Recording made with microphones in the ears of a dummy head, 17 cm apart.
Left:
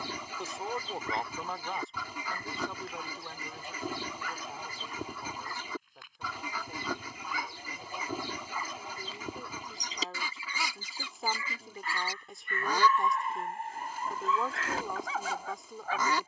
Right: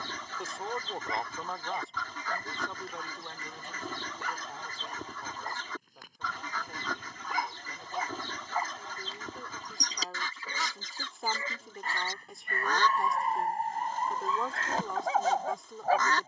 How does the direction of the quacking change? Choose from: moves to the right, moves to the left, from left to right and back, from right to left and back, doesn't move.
doesn't move.